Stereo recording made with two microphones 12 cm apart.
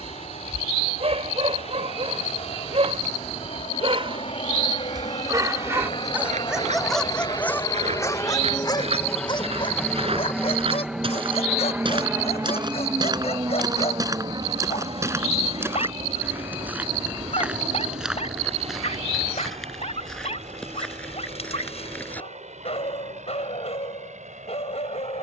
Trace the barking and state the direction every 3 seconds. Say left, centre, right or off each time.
right, right, centre, left, left, left, left, left, left.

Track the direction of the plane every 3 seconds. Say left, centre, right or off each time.
left, left, left, centre, right, right, right, right, right.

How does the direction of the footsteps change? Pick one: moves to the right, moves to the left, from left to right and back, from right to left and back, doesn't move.
moves to the left.